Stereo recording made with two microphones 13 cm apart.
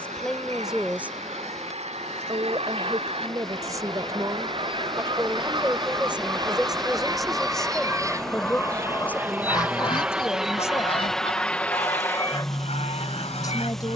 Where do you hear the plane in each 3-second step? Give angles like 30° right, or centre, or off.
50° right, 50° right, 30° right, centre, 20° left.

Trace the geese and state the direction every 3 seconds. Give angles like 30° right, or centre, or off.
60° right, 40° right, 10° right, 40° left, 60° left.